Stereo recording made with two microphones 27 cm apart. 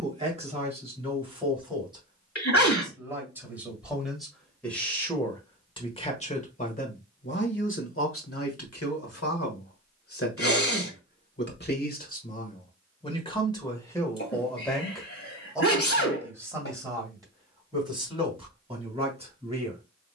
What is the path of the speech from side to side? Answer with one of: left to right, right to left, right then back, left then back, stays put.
left then back.